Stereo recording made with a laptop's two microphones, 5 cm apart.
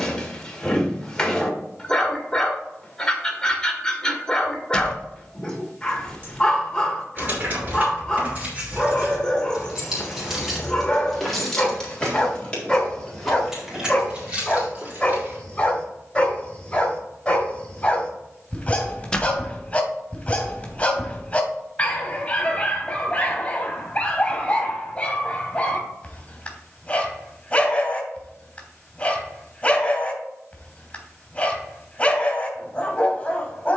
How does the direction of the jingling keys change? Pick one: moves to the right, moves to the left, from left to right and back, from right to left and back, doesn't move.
from right to left and back.